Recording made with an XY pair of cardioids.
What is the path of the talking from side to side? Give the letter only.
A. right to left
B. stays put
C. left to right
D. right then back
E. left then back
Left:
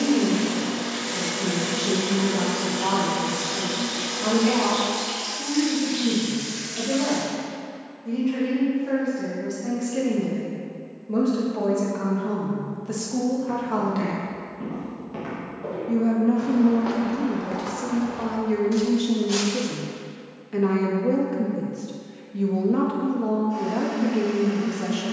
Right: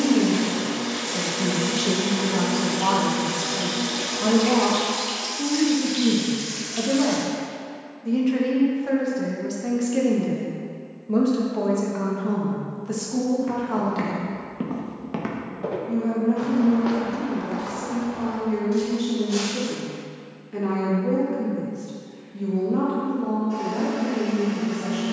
A.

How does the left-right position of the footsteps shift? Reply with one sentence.
In this clip you hear the footsteps travel towards the left.